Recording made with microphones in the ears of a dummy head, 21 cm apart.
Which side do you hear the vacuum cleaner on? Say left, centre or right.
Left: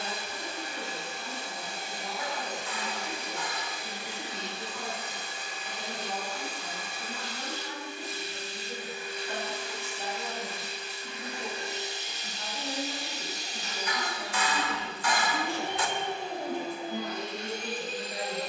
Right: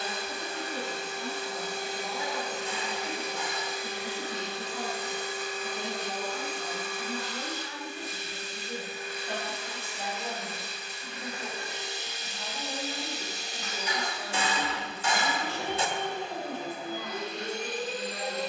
right.